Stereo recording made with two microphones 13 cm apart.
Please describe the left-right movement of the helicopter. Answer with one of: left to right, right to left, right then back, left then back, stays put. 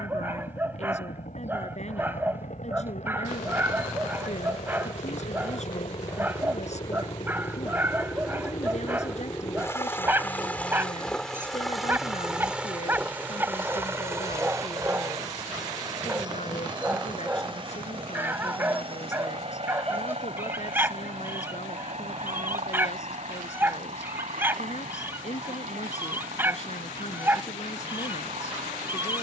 left to right.